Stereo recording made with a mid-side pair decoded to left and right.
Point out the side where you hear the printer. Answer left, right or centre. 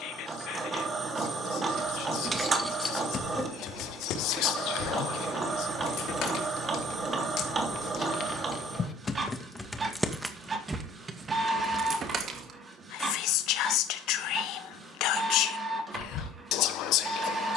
right.